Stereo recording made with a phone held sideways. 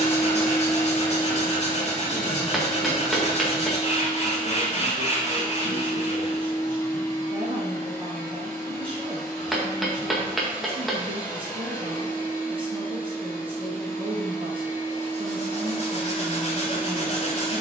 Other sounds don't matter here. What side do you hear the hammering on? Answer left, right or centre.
centre.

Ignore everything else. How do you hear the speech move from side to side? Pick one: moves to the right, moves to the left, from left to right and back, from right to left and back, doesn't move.
doesn't move.